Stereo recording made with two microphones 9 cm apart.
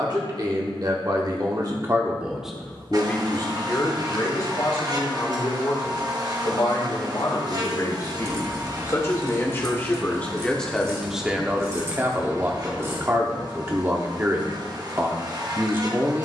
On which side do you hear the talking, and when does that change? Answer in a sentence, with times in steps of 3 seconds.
In this clip you hear the talking on the right from 0 s, on the left from 3 s, in the centre from 9 s and on the right from 12 s.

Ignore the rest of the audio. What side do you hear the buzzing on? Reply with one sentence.
You can hear the buzzing on the right.